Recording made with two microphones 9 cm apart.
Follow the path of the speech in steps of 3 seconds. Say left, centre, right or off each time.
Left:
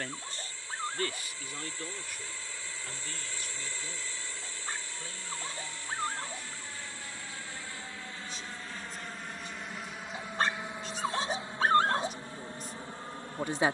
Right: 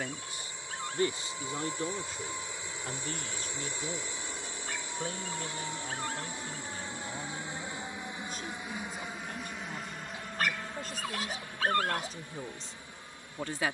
right, right, right, right, centre.